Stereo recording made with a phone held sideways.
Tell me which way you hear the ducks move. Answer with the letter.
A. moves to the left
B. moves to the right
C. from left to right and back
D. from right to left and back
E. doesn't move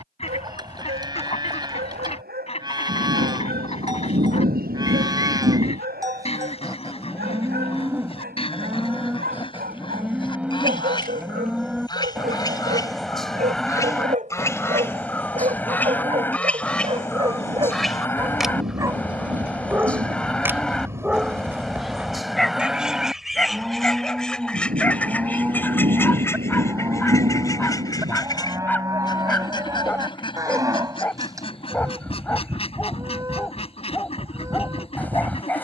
C.